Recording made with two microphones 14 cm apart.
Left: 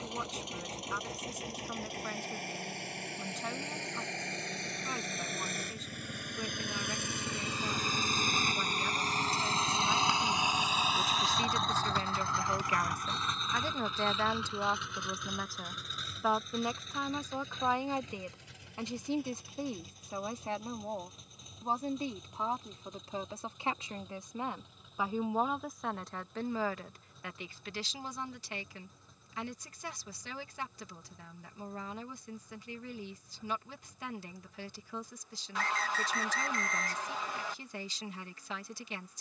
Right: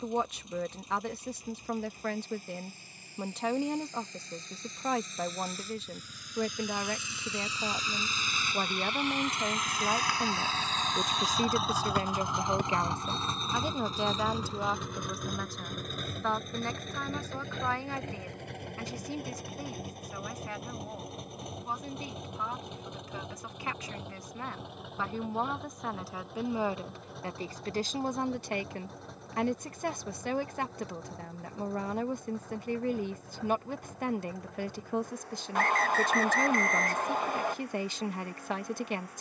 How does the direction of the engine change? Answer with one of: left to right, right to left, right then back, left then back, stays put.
left to right.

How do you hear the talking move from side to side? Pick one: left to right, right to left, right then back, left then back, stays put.
left then back.